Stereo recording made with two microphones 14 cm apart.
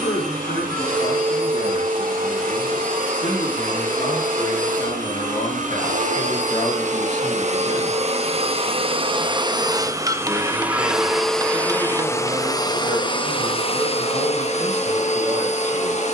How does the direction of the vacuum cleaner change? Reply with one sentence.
You can hear the vacuum cleaner go from the right side to the left.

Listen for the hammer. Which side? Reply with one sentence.
You can hear the hammer on the right.